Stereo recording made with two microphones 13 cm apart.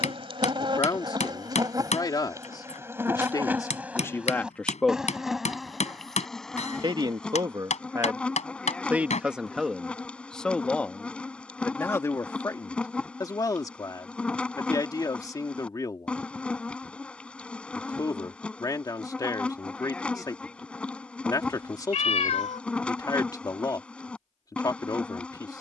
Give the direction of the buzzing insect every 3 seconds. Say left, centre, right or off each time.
right, centre, centre, centre, centre, centre, centre, centre, centre.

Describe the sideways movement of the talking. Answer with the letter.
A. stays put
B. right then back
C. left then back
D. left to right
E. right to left
B.